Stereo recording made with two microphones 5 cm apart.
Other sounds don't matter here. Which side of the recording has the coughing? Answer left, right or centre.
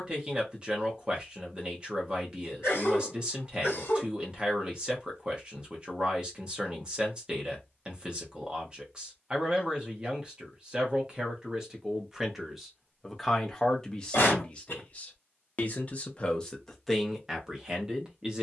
left.